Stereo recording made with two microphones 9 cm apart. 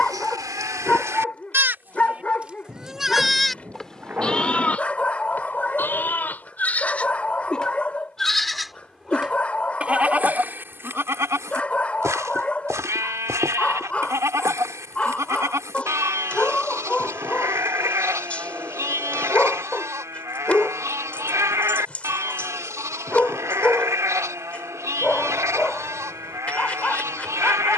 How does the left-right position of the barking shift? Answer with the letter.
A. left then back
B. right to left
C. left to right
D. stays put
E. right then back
D.